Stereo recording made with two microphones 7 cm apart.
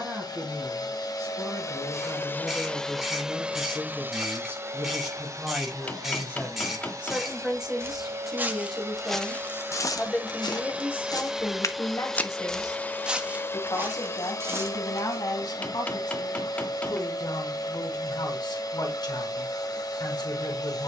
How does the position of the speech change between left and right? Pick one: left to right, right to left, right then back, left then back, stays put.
right to left.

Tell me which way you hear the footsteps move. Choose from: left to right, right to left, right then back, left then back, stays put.
left then back.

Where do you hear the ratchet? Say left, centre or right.
centre.